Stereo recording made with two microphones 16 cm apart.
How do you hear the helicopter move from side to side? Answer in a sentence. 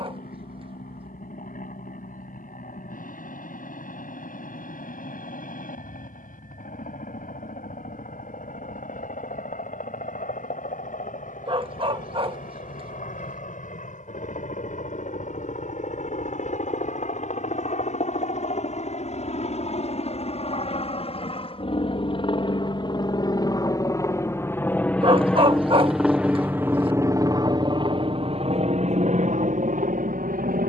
You can hear the helicopter move from left to right.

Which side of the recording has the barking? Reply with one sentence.
In this clip you hear the barking on the right.